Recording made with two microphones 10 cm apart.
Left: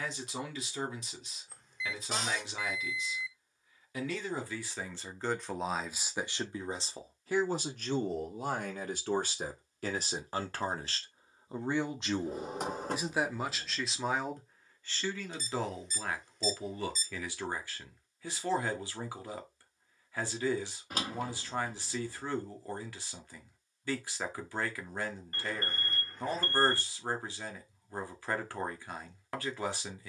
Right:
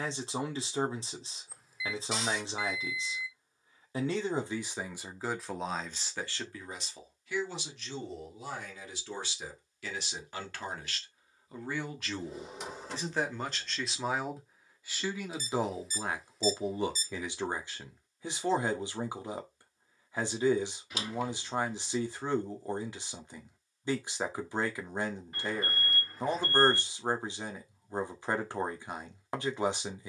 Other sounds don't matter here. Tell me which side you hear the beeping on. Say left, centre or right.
centre.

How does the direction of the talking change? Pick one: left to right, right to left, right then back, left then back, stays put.
left then back.